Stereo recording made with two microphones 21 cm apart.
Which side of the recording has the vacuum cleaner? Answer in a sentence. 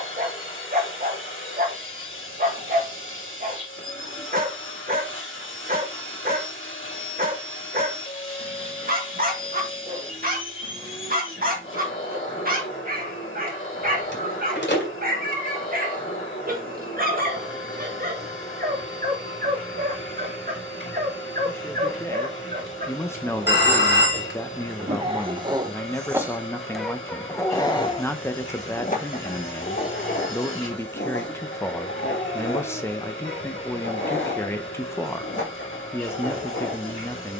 You can hear the vacuum cleaner on the left.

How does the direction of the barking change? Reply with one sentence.
You can hear the barking move to the left.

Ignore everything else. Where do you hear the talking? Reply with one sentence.
In this clip you hear the talking in the centre.